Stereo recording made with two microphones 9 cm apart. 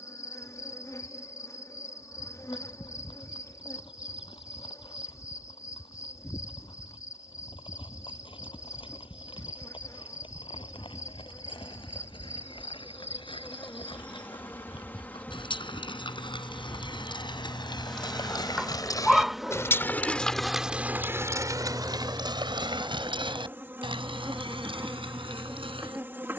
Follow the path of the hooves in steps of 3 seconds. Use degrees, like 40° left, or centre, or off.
80° left, 80° left, 80° left, 70° left, 70° left, 60° left, 30° left, 60° right, 80° right.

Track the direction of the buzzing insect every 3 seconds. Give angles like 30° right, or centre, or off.
40° left, 40° left, 40° left, 40° left, 30° left, 10° left, 10° right, 20° right, 30° right.